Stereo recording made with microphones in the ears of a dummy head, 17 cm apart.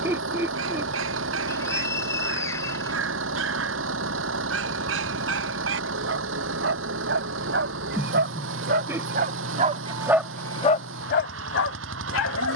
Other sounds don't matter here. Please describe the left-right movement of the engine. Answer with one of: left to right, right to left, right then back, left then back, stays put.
stays put.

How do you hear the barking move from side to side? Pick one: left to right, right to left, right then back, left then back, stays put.
right to left.